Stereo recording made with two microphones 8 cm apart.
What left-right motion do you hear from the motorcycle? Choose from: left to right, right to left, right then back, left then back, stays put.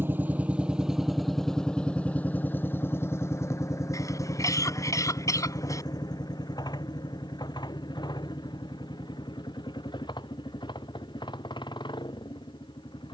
right to left.